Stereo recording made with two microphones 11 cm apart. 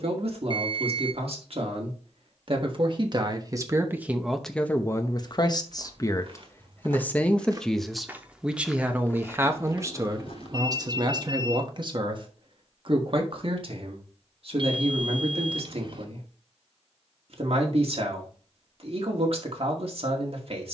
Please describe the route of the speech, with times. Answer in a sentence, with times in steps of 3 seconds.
You can hear the speech on the right from 0 s, in the centre from 3 s and on the right from 9 s.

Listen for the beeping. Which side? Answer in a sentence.
You can hear the beeping on the right.